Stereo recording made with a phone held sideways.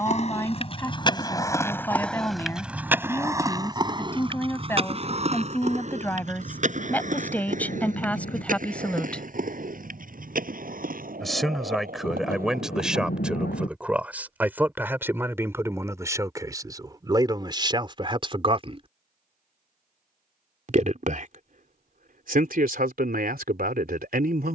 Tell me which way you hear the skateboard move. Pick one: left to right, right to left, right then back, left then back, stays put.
left to right.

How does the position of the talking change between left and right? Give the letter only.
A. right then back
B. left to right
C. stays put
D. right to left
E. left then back
B.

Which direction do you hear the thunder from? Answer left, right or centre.
left.